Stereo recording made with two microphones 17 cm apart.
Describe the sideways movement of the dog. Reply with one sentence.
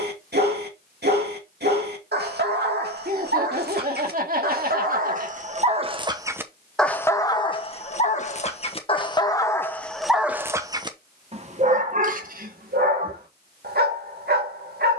In this clip you hear the dog move from right to left and back again.